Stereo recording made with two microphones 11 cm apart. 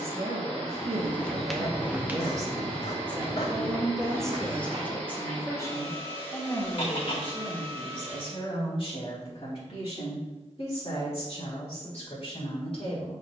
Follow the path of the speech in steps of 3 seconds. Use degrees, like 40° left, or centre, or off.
40° right, 10° left, 40° left, 60° left, 60° left.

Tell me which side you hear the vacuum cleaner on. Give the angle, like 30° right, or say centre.
10° left.